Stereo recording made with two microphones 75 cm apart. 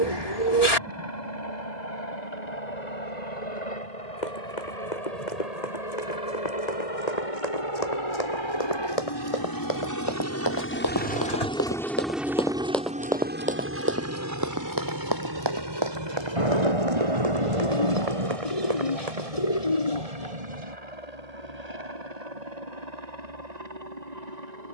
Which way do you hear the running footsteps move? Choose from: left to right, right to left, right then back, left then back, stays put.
left to right.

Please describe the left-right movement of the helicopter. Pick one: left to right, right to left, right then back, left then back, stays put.
left to right.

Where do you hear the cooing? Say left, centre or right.
left.